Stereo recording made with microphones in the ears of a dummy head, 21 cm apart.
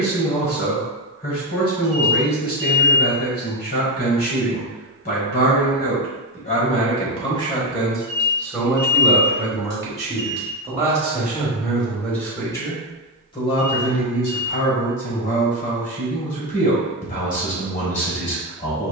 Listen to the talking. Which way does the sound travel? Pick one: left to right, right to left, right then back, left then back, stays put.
right then back.